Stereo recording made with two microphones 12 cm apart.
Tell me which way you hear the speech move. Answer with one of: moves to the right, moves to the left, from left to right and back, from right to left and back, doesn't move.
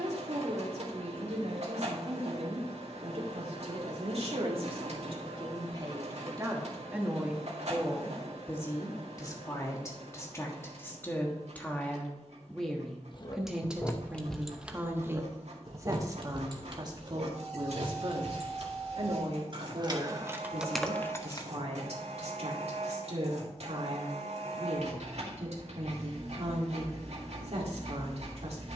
from right to left and back.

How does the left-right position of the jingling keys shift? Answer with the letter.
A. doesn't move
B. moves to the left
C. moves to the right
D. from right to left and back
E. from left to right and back
E.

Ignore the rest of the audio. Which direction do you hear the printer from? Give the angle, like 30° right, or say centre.
70° right.